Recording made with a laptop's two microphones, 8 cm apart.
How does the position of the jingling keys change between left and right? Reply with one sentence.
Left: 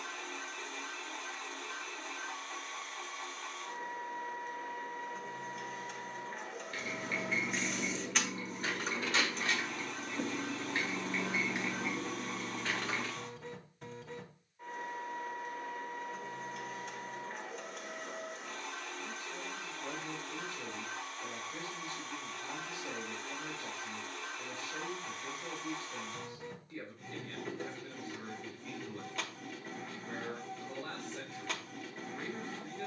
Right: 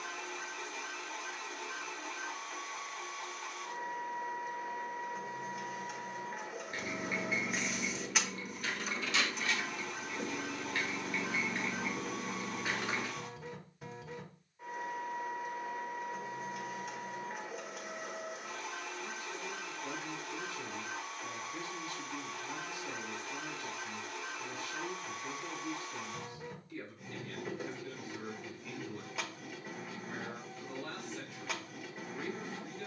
In this clip you hear the jingling keys go left and come back.